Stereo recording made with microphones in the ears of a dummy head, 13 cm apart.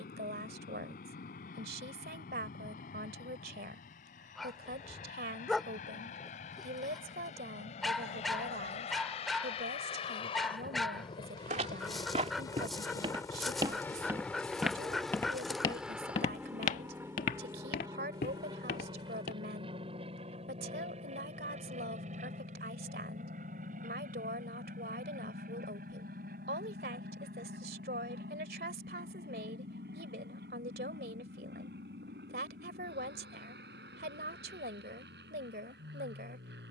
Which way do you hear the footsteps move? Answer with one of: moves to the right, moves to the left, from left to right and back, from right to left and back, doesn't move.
moves to the left.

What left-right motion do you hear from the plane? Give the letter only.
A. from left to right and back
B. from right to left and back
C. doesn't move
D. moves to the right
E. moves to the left
D.